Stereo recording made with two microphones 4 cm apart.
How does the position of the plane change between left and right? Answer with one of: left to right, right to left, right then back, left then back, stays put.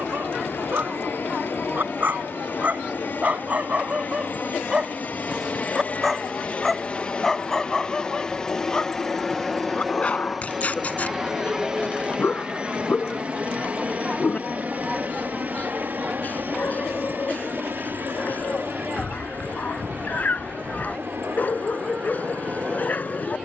left to right.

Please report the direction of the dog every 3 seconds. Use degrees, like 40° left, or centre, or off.
50° right, 30° right, 10° left, 40° left, 40° left, 40° left, 40° left, 40° left.